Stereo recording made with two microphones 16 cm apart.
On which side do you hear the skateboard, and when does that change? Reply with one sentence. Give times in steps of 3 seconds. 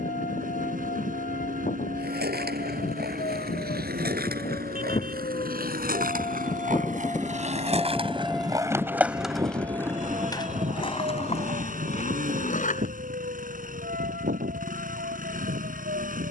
You can hear the skateboard on the right from 0 s, on the left from 9 s and not at all from 15 s.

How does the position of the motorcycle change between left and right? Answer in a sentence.
You can hear the motorcycle stay in one place.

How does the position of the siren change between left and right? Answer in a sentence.
In this clip you hear the siren move from left to right.